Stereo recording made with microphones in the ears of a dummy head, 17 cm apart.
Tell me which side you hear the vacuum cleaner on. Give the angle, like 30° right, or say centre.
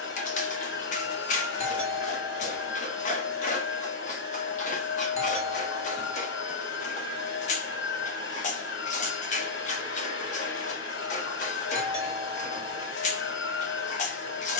60° left.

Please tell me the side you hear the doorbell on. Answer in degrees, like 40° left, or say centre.
30° left.